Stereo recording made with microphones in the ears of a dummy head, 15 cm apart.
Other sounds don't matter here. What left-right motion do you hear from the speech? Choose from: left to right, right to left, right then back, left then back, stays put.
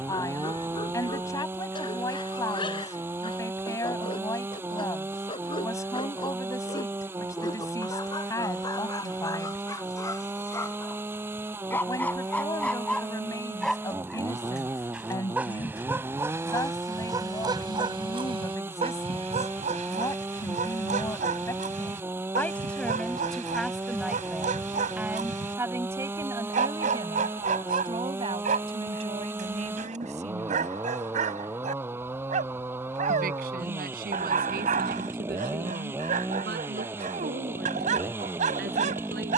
left to right.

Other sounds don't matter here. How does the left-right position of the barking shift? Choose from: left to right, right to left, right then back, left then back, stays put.
left to right.